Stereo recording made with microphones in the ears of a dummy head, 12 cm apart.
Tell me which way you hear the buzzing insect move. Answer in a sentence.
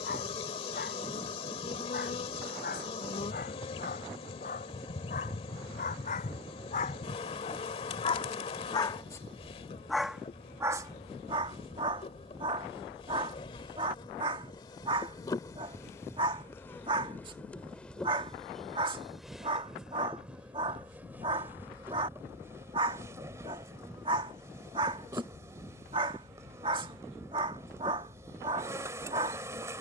You can hear the buzzing insect travel towards the right.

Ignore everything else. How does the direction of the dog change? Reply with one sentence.
You can hear the dog go from the left side to the right.